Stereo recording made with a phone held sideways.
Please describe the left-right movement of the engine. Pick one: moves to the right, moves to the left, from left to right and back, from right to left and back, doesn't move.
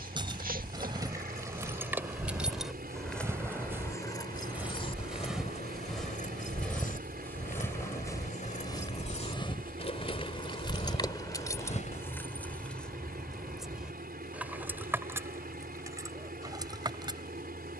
doesn't move.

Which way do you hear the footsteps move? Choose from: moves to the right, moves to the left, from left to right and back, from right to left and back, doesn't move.
moves to the left.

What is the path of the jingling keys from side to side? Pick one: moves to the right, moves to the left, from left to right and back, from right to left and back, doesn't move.
from right to left and back.